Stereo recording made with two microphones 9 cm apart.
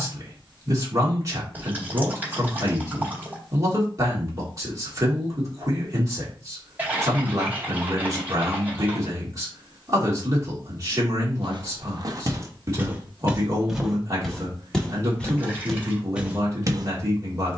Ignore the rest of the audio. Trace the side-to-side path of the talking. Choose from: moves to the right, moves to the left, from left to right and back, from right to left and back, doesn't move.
doesn't move.